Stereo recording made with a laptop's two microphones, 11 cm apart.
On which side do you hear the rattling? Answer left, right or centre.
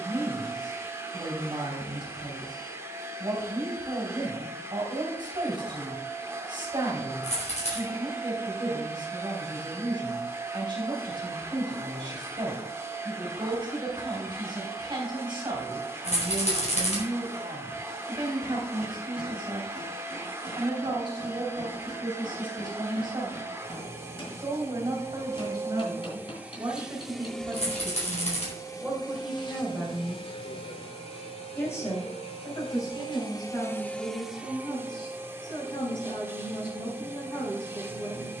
left.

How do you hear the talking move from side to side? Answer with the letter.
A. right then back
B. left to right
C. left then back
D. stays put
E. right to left
E.